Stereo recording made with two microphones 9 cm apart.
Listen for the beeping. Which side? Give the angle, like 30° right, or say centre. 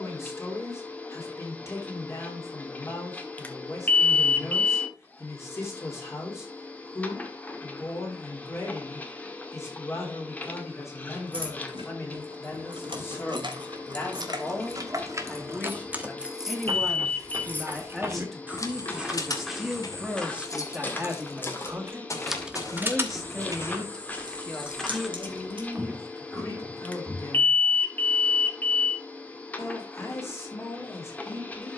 20° left.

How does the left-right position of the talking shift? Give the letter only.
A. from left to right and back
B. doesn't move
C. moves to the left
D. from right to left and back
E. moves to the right
A.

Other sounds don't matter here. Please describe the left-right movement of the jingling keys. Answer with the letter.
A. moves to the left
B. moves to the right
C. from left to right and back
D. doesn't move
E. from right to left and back
E.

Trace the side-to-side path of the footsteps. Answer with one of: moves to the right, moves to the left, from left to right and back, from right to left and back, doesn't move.
from right to left and back.